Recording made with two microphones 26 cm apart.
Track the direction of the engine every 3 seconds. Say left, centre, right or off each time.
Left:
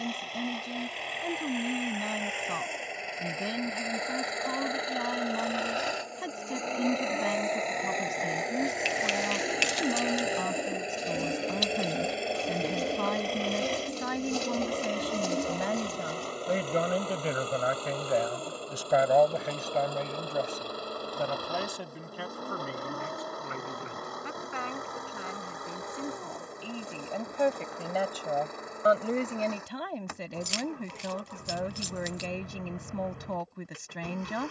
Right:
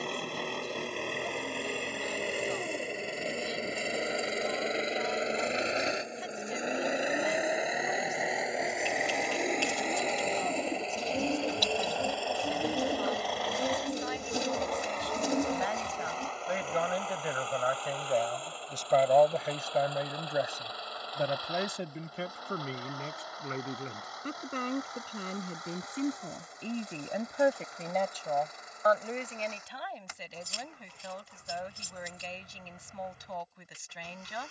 right, right, centre, centre, left, left, left, left, left, left, left, left.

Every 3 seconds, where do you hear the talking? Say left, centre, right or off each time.
left, left, left, left, left, left, centre, right, right, left, left, left.